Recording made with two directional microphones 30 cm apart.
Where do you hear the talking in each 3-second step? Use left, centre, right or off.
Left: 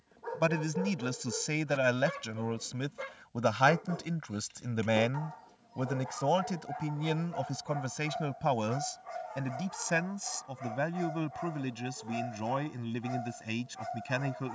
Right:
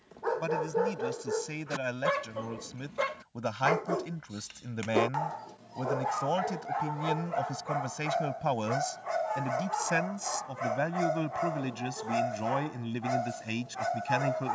left, left, centre, centre, centre.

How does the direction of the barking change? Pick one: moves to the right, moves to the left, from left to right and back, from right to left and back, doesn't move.
doesn't move.